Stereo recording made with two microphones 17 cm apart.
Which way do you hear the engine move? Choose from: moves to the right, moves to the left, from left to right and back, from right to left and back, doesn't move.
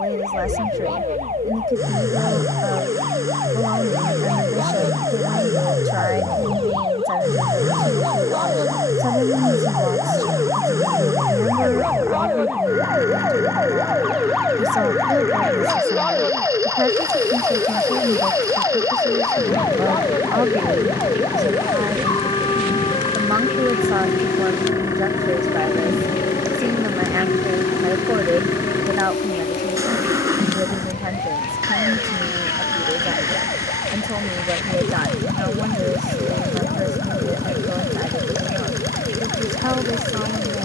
doesn't move.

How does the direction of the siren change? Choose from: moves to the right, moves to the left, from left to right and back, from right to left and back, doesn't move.
moves to the left.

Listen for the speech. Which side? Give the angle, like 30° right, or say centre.
20° right.